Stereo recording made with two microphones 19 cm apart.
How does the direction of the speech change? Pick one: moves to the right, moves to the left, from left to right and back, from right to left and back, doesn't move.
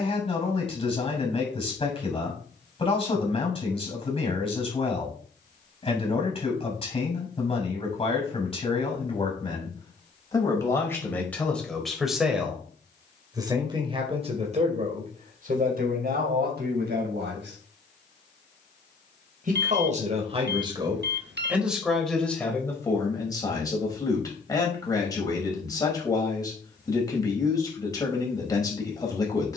from left to right and back.